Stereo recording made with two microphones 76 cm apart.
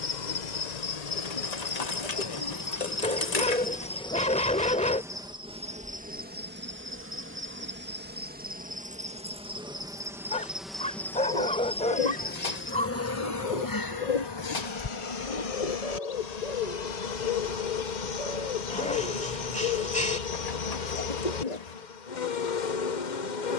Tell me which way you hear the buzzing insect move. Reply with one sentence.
In this clip you hear the buzzing insect go right and come back.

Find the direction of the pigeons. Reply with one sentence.
In this clip you hear the pigeons on the left.